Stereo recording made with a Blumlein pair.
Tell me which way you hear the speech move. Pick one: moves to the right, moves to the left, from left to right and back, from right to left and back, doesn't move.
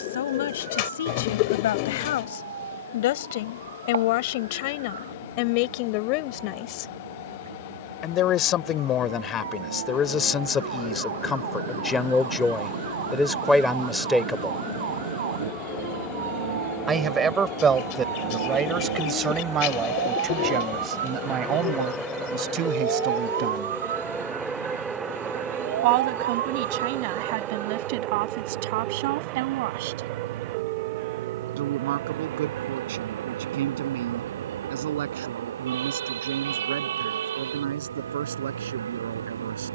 moves to the right.